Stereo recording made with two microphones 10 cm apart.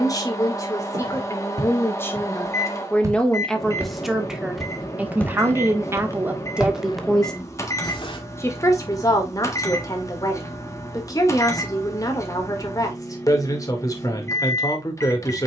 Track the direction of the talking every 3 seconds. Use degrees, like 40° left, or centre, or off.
30° left, 10° right, centre, 30° left, 30° left.